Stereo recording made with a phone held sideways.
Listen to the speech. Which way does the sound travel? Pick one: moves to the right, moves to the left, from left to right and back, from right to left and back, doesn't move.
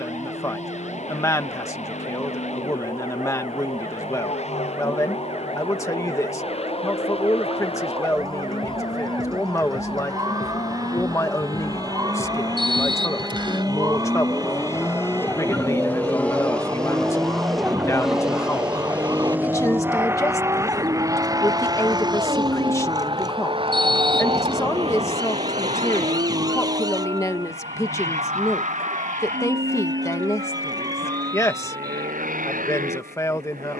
doesn't move.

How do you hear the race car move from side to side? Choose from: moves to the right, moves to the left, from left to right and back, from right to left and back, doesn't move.
moves to the right.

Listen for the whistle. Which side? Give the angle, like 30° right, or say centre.
40° right.